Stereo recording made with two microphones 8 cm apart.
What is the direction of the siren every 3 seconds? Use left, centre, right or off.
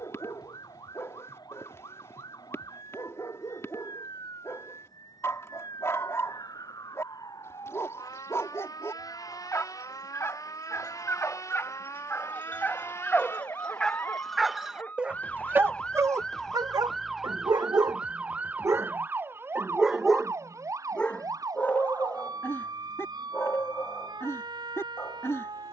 left, left, left, left, left, centre, right, right, right.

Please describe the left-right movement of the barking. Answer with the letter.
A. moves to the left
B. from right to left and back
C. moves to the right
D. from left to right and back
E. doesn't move
D.